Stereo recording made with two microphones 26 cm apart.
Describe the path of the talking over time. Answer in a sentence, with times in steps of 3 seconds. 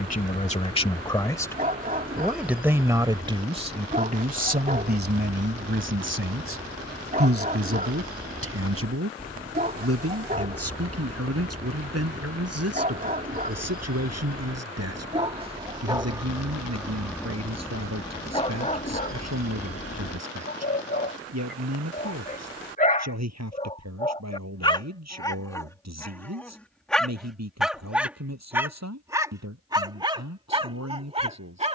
In this clip you hear the talking in the centre from 0 s and on the right from 3 s.